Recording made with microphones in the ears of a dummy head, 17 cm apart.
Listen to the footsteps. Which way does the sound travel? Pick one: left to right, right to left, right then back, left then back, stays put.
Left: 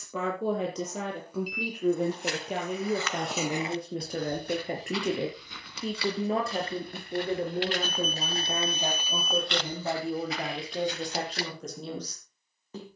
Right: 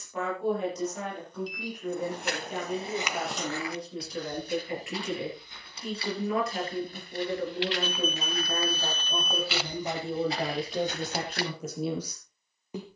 left then back.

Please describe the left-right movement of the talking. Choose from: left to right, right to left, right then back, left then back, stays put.
left to right.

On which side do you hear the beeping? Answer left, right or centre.
centre.